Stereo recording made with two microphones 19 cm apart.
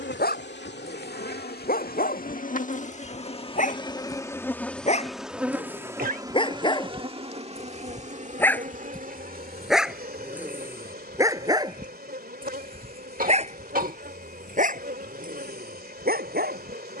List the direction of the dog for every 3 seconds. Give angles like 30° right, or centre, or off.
50° left, 40° left, 20° left, 10° right, 40° right, 50° right.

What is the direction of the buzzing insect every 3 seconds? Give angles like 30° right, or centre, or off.
50° left, 10° left, 30° right, 50° right, 50° right, 50° right.